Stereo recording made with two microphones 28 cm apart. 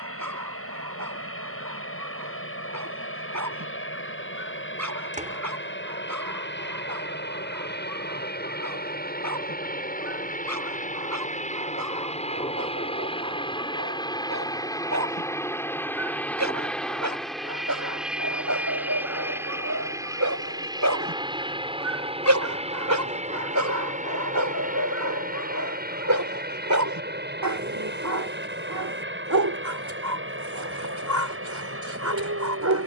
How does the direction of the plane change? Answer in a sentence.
In this clip you hear the plane move to the right.